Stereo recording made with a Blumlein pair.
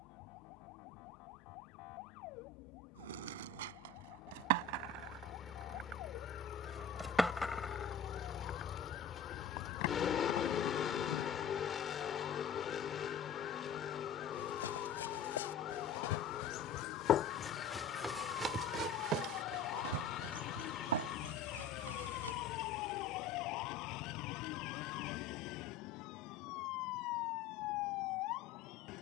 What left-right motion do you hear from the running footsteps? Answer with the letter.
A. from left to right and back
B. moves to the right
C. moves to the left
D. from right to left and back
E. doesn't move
B.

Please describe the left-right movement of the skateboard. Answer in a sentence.
You can hear the skateboard travel towards the left.